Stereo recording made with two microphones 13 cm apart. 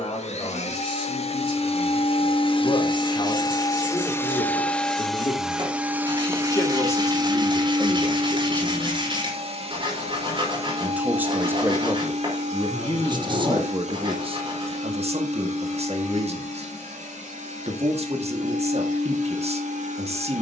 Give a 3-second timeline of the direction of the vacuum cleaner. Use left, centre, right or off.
left, centre, right, right, right, right, right.